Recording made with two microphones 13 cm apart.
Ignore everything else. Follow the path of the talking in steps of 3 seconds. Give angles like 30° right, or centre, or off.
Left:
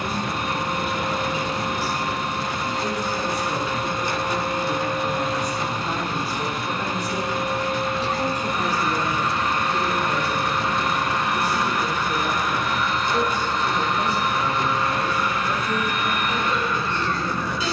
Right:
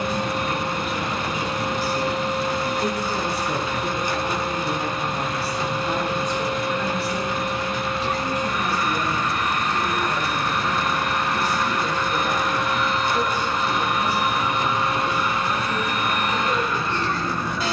40° right, 20° right, 20° left, 60° left, 60° left, 60° left.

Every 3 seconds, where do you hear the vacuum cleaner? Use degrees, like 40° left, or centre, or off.
50° left, 40° left, 40° left, 20° left, 10° right, 40° right.